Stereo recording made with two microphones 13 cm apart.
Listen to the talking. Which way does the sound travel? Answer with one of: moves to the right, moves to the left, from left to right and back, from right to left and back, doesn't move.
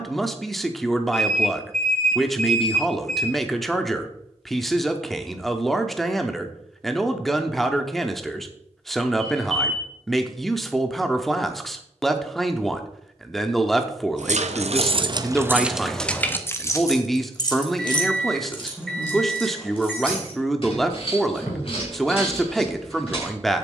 doesn't move.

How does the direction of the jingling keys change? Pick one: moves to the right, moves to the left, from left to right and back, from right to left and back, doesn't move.
moves to the left.